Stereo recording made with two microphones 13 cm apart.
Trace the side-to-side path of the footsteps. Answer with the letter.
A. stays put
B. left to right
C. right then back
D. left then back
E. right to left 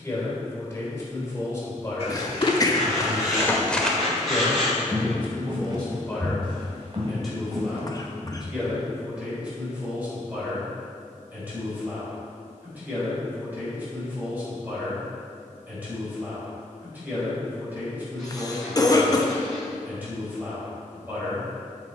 B.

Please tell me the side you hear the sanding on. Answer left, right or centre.
centre.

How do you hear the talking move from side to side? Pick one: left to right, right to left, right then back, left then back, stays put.
left to right.